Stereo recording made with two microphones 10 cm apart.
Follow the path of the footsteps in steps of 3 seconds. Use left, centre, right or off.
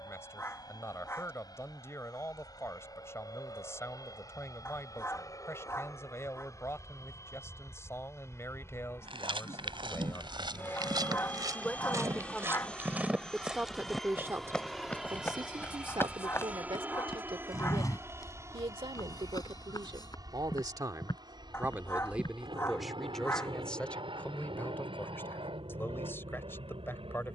off, off, off, right, centre, left, left, left, off.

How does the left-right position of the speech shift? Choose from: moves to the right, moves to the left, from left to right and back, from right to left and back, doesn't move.
from left to right and back.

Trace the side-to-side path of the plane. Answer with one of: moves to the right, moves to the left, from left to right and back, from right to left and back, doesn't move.
moves to the right.